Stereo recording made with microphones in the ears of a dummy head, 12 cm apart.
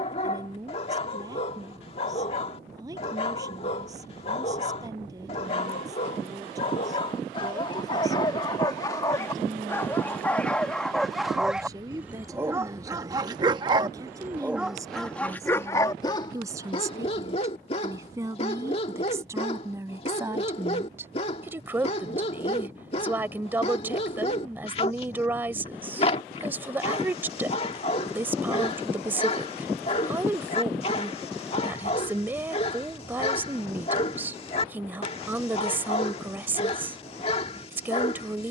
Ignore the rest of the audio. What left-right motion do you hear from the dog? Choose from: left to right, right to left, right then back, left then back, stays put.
right then back.